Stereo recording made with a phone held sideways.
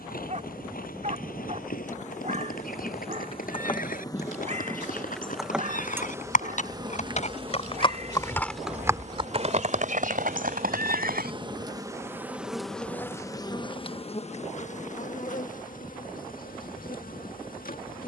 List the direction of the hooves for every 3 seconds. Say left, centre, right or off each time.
left, left, left, right, off, off.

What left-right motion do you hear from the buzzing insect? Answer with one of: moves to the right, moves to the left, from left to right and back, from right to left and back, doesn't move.
from left to right and back.